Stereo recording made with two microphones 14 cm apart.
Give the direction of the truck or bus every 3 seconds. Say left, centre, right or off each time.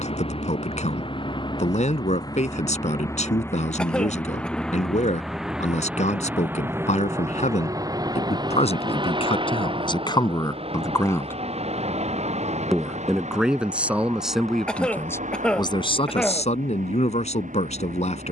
left, centre, right, right, right, right.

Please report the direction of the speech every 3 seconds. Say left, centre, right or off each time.
left, left, left, left, centre, left.